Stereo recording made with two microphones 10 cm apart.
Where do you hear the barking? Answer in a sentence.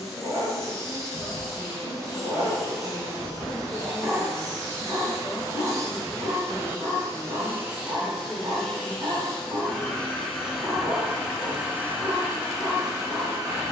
You can hear the barking on the right.